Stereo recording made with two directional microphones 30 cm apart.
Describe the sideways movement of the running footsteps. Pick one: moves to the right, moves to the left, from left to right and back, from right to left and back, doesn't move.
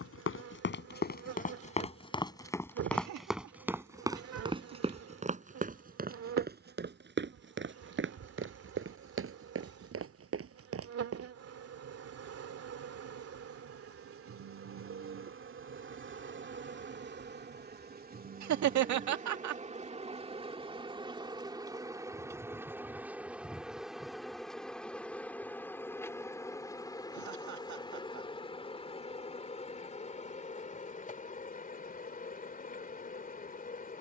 moves to the right.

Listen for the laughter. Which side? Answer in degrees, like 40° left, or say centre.
70° right.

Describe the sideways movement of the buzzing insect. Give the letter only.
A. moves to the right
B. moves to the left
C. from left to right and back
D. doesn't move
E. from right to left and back
B.